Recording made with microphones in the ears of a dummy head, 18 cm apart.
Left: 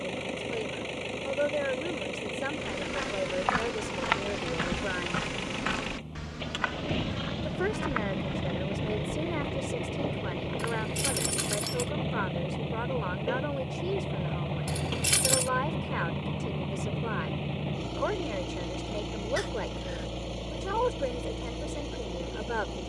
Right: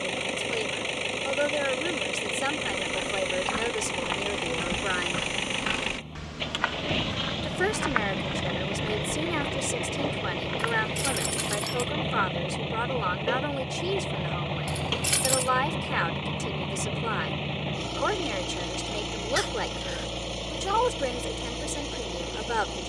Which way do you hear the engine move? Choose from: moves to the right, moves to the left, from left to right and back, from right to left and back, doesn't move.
doesn't move.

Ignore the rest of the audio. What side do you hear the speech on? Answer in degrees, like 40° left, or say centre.
60° right.